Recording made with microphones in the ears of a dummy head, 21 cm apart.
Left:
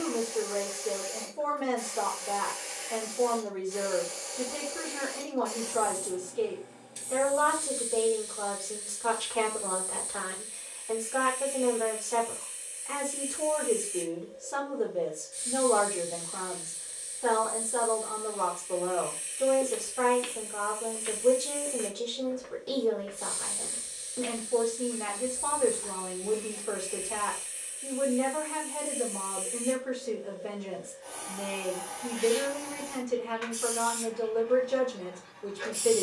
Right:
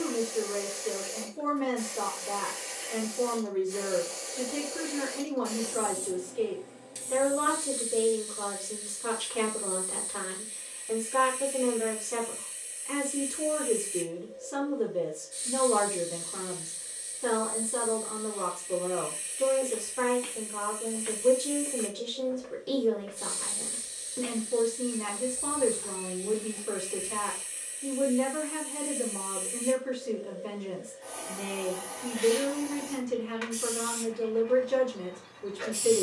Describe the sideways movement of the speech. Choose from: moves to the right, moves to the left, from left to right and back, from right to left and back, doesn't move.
doesn't move.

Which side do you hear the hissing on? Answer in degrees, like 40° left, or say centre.
70° right.